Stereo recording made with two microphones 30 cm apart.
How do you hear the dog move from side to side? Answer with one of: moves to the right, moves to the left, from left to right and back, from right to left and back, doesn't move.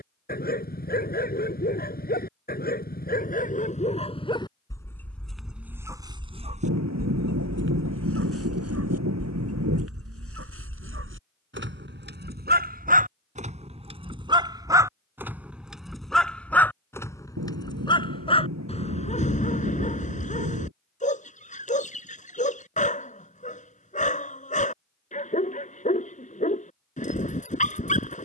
from left to right and back.